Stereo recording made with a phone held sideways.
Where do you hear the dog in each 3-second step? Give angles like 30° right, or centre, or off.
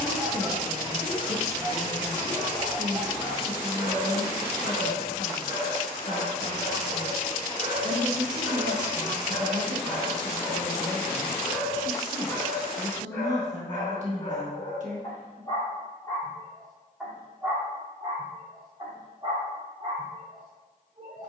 30° right, 30° right, 30° right, centre, 20° left, 10° left, 30° right.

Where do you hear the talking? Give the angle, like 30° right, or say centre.
50° right.